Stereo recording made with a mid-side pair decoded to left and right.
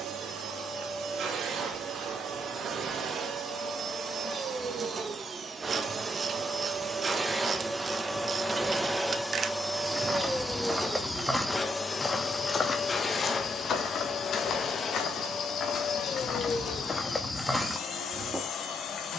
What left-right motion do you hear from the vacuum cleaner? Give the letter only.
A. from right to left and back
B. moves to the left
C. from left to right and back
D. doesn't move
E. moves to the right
B.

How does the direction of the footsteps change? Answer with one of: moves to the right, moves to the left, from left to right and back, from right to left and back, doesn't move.
from right to left and back.